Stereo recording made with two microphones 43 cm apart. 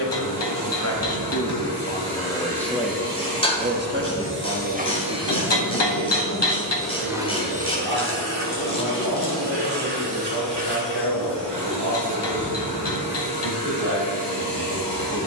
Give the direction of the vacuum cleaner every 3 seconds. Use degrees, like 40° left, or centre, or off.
70° right, 30° right, 20° right, 70° right, 70° right.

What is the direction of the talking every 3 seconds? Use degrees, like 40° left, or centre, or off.
30° left, 40° right, 70° right, 70° right, 80° right.